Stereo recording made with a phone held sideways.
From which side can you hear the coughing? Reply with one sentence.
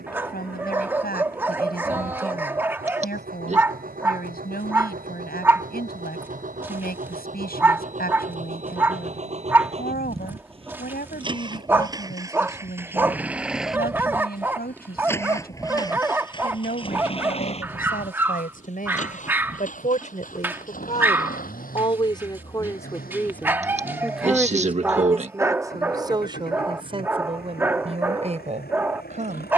You can hear the coughing on the right.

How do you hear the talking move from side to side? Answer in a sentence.
You can hear the talking travel towards the right.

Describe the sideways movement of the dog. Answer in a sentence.
In this clip you hear the dog stay in one place.